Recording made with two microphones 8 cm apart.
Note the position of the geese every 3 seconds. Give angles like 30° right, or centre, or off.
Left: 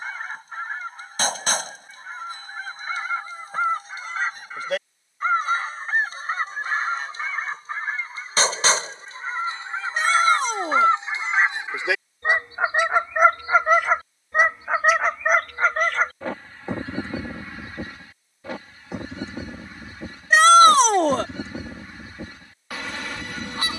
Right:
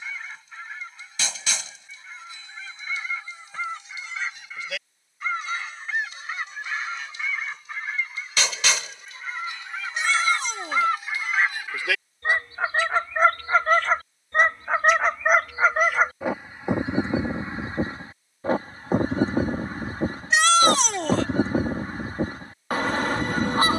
40° left, 40° left, 40° left, 30° left, 10° left, 20° right, 50° right, 50° right.